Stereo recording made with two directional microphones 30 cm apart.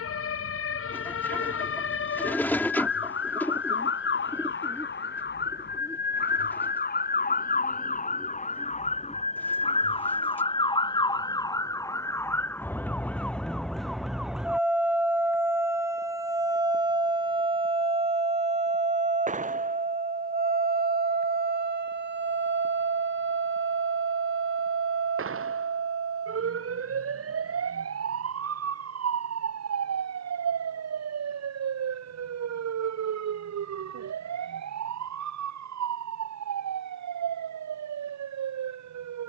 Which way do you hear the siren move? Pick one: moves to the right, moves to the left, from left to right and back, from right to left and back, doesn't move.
moves to the right.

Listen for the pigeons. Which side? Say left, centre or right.
centre.